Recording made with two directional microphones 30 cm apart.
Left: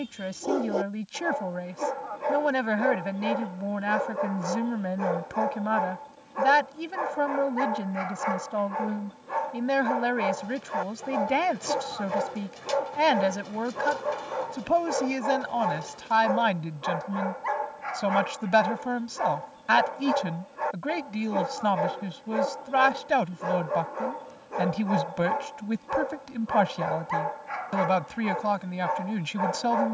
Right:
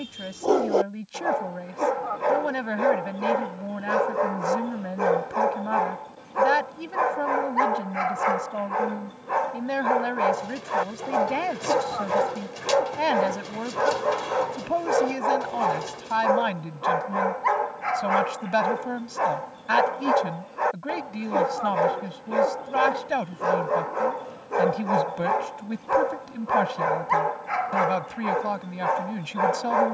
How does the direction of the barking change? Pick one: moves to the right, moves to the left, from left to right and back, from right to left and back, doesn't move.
doesn't move.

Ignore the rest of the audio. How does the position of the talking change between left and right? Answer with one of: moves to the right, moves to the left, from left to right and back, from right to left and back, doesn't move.
doesn't move.